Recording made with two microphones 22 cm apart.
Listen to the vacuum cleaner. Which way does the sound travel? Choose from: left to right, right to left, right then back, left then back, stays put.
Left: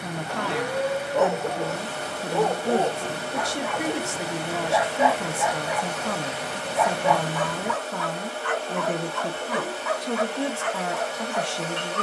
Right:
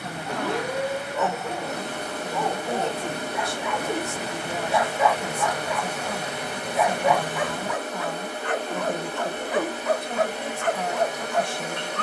stays put.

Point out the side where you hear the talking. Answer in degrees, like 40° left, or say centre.
80° left.